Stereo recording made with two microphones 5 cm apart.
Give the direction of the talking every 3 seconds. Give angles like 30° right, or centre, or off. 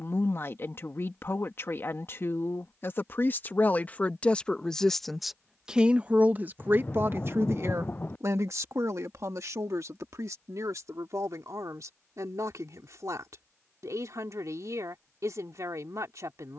50° left, 20° left, 50° right, 70° right, 80° right, 80° right.